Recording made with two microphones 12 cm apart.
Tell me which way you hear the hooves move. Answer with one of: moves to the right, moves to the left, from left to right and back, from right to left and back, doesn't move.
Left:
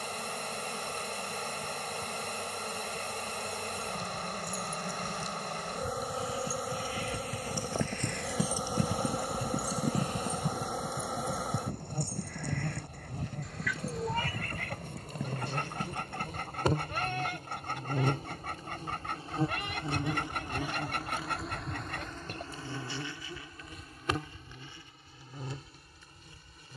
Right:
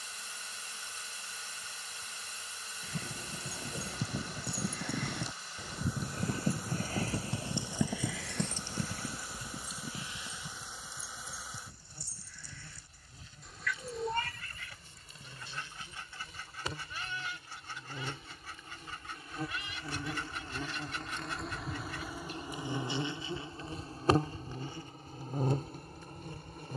moves to the left.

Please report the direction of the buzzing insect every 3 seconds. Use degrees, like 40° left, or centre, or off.
70° left, 70° left, 70° left, 70° left, 60° left, 50° left, 30° left, 10° right, 50° right.